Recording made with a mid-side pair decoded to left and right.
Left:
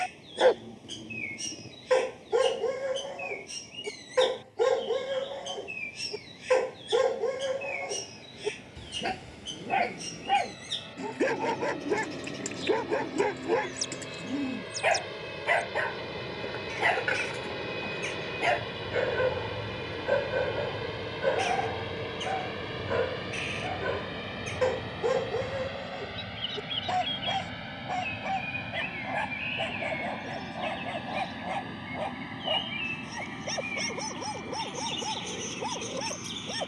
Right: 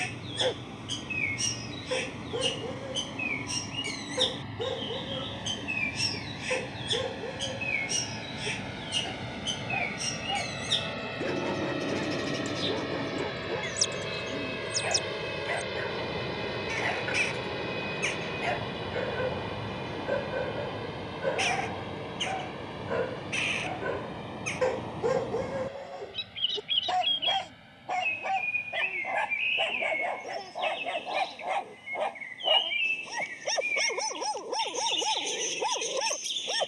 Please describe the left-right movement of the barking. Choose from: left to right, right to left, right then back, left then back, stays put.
left to right.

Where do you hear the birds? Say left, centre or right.
right.